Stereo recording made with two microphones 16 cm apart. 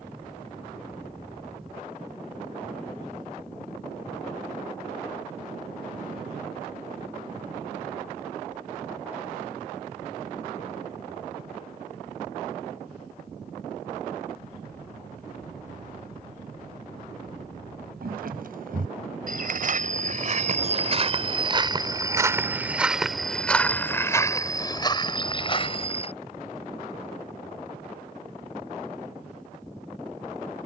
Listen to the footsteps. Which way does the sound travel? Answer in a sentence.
In this clip you hear the footsteps move to the left.